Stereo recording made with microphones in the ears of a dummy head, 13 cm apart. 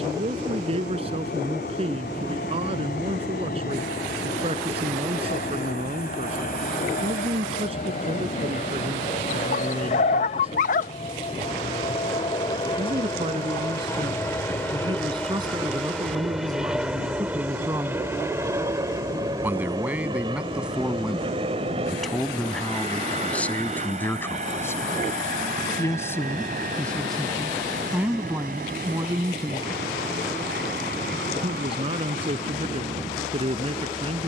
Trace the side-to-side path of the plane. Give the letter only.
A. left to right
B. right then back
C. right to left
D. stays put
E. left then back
A.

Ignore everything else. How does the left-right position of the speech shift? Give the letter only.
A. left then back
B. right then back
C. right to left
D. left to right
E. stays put
A.